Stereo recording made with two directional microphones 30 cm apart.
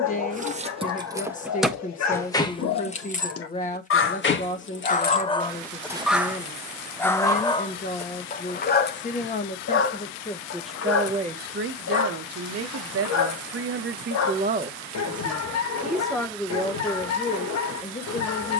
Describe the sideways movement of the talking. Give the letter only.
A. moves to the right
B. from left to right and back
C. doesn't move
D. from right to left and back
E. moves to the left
B.